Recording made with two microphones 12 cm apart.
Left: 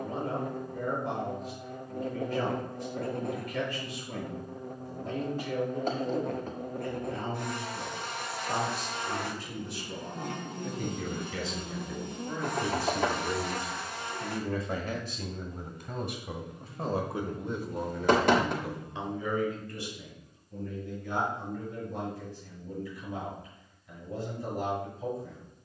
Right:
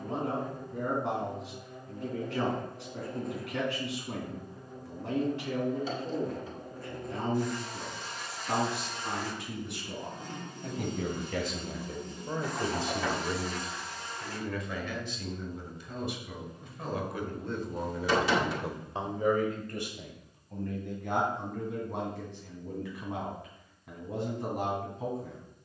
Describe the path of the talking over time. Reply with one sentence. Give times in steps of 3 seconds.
In this clip you hear the talking on the right from 0 s, in the centre from 12 s, on the left from 15 s and on the right from 18 s.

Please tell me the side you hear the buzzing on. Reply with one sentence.
In this clip you hear the buzzing on the left.